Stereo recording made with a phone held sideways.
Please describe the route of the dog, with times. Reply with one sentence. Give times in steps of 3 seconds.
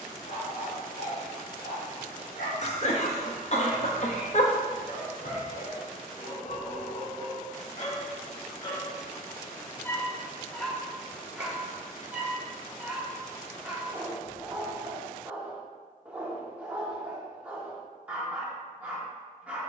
In this clip you hear the dog on the left from 0 s and in the centre from 9 s.